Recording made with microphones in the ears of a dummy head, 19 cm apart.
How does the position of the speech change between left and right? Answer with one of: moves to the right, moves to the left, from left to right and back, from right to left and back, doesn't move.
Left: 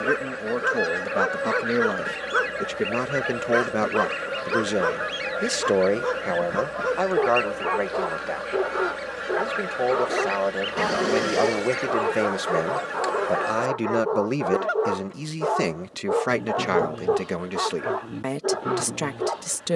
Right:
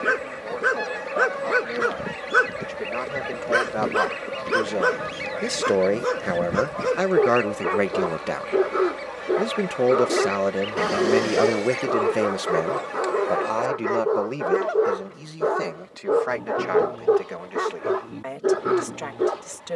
from left to right and back.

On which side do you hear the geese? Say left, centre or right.
centre.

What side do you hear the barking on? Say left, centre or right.
right.